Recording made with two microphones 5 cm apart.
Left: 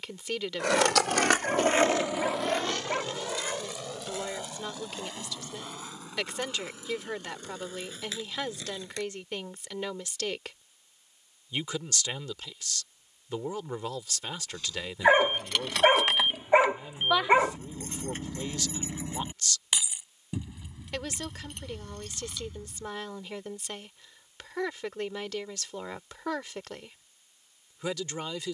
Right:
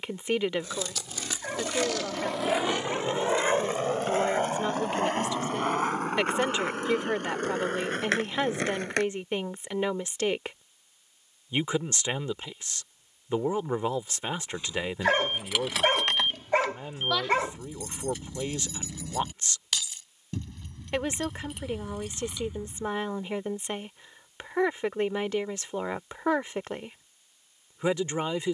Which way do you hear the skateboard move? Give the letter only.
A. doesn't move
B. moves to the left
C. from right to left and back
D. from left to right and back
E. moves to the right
E.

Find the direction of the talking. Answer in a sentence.
You can hear the talking on the right.